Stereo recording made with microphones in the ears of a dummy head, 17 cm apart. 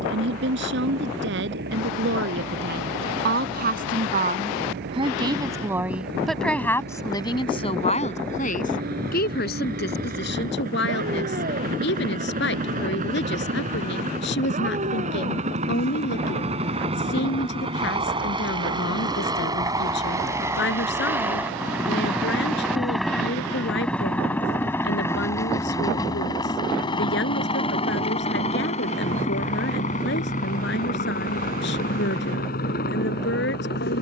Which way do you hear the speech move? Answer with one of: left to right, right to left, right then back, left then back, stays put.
right to left.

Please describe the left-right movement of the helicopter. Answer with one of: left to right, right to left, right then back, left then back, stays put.
right to left.